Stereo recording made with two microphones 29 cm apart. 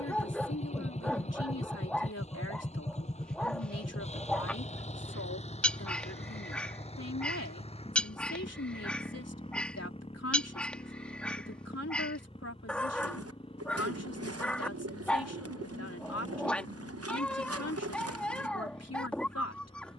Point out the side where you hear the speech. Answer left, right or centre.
left.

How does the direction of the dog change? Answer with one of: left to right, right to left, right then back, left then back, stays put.
stays put.